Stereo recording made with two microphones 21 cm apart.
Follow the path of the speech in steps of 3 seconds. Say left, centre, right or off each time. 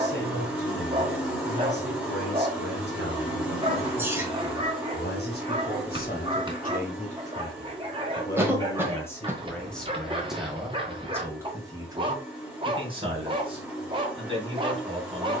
left, left, left, centre, right.